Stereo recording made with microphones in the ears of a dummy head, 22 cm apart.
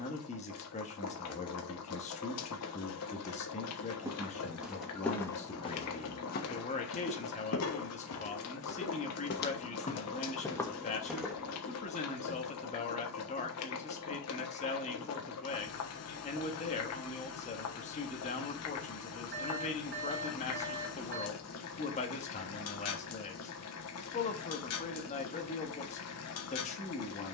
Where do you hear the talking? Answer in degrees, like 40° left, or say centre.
30° left.